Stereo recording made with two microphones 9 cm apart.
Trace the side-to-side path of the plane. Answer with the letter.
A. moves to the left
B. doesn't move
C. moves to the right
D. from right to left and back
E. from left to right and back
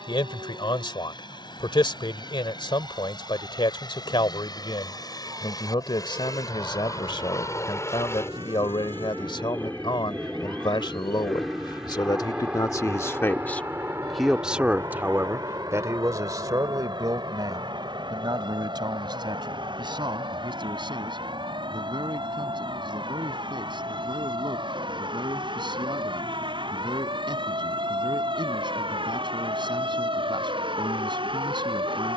C.